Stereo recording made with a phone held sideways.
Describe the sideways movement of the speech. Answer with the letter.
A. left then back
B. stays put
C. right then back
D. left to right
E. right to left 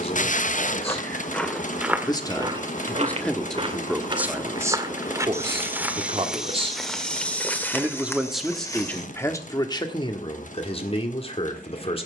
C.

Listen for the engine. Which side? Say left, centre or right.
left.